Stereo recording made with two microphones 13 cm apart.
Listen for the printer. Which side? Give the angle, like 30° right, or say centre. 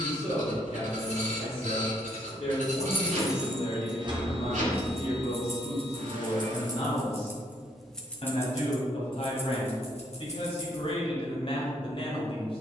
80° right.